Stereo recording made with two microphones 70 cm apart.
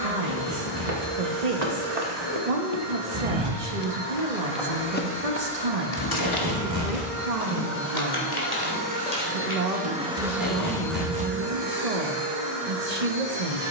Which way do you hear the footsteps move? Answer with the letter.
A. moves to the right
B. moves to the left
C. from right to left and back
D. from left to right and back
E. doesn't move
B.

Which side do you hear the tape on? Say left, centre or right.
right.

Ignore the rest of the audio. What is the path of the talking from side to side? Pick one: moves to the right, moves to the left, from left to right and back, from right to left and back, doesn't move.
doesn't move.